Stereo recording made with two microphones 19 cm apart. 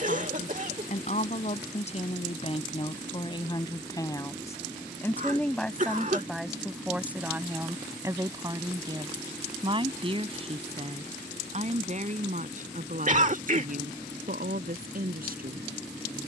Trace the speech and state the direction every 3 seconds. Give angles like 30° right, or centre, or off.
40° left, 10° left, 10° right, 30° right, 50° right, 50° right.